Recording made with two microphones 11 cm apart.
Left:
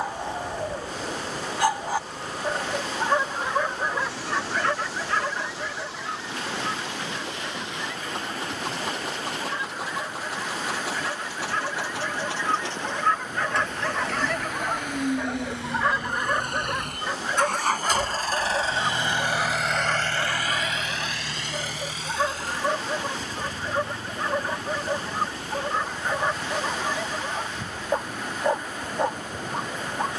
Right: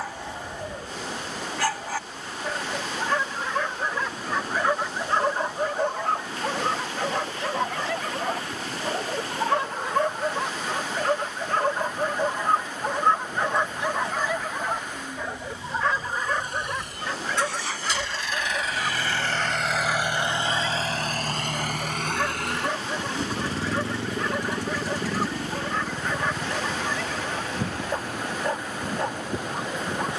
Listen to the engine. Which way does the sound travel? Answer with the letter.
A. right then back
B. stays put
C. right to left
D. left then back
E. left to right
E.